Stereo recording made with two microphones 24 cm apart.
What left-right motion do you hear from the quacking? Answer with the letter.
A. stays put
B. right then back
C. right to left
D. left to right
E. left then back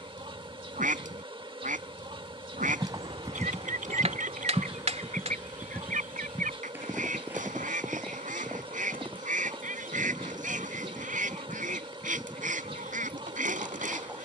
A.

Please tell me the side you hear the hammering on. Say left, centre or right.
right.